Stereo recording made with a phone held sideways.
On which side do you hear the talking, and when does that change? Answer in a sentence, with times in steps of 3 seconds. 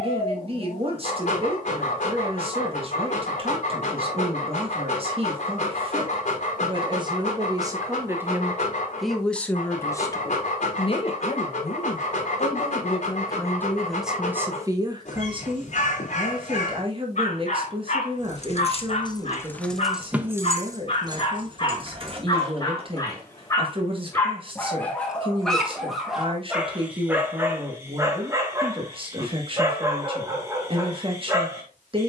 You can hear the talking on the right from 0 s, on the left from 9 s, in the centre from 12 s and on the right from 15 s.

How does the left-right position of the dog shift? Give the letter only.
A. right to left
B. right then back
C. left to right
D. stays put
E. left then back
C.